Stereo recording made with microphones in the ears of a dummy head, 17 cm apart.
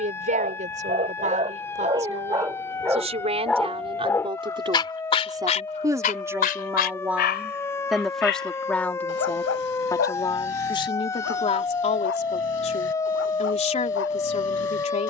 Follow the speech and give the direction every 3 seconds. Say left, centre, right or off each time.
right, right, centre, left, left.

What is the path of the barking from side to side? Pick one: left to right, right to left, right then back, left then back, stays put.
right to left.